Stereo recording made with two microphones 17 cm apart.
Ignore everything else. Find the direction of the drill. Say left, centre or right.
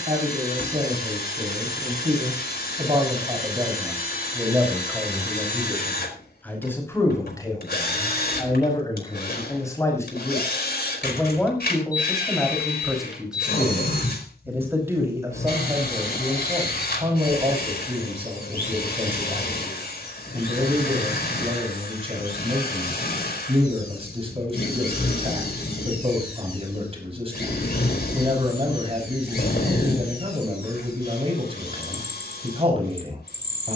left.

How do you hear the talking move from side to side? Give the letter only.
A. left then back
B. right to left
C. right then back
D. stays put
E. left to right
A.